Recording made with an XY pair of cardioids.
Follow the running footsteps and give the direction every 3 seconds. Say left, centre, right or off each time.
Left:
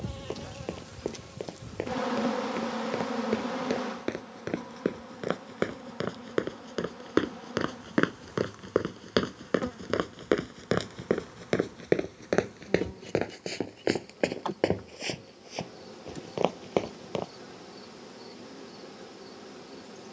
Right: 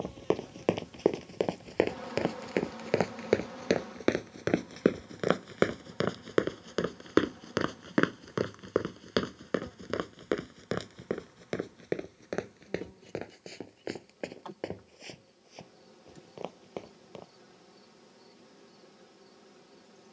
right, right, centre, left, left, left, off.